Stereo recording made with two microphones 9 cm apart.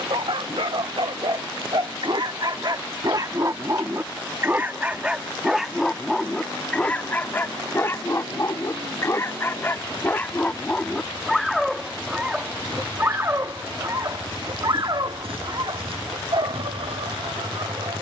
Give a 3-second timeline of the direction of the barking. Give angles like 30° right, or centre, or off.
60° right, 20° right, 20° left, 10° left, 30° right, 60° right.